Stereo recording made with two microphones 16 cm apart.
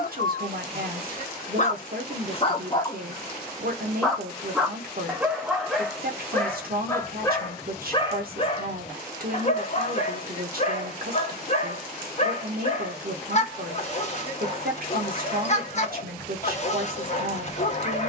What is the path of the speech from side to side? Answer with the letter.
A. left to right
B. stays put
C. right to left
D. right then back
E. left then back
B.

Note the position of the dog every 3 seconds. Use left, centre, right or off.
left, centre, left, left, left, left.